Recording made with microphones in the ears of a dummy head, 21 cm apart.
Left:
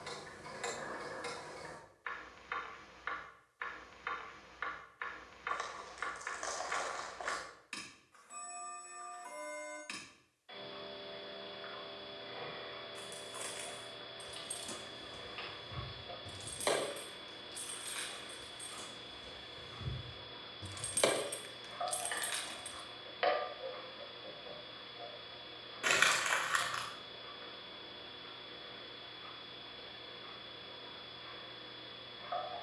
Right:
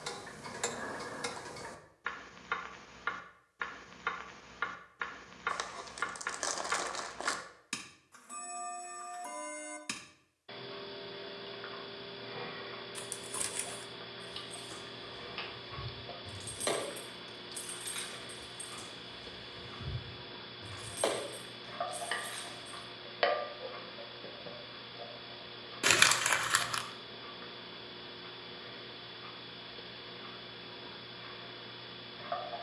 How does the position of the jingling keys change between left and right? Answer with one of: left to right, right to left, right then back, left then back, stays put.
right then back.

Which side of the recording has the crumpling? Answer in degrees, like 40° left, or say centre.
50° right.